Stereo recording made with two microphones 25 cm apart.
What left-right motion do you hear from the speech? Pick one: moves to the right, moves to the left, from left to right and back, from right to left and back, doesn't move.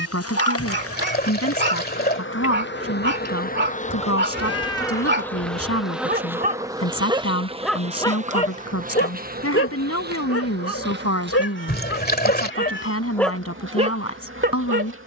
doesn't move.